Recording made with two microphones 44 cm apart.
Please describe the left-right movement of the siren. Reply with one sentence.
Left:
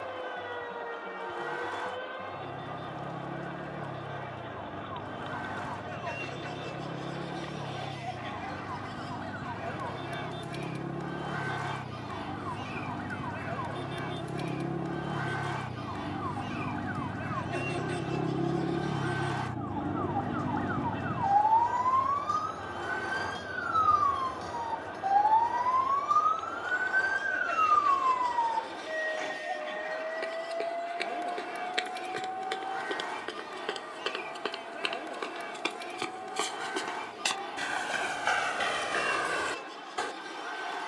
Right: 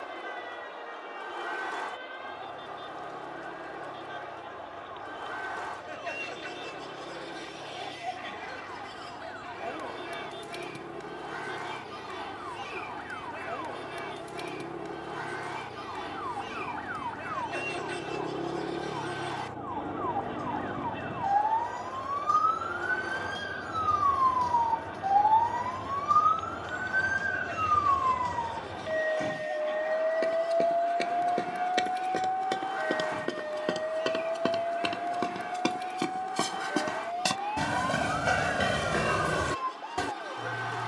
In this clip you hear the siren travel towards the right.